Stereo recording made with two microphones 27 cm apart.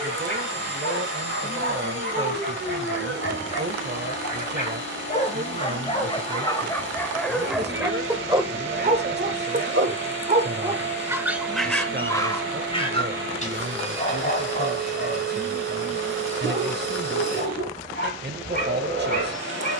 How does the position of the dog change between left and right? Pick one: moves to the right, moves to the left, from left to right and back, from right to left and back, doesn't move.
from left to right and back.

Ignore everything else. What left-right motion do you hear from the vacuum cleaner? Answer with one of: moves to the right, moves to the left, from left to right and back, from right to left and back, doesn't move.
doesn't move.